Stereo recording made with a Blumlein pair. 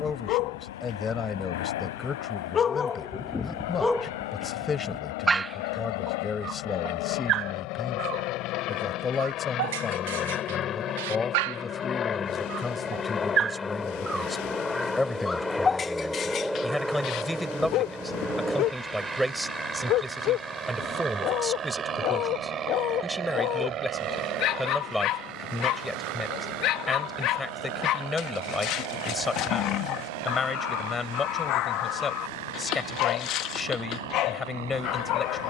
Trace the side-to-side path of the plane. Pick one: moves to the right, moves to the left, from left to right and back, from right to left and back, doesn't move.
moves to the right.